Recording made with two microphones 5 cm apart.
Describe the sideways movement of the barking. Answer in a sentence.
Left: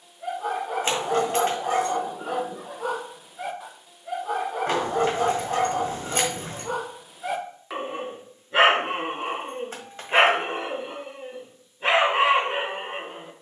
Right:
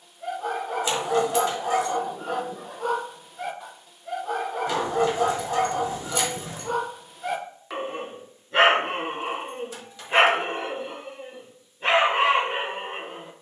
In this clip you hear the barking stay put.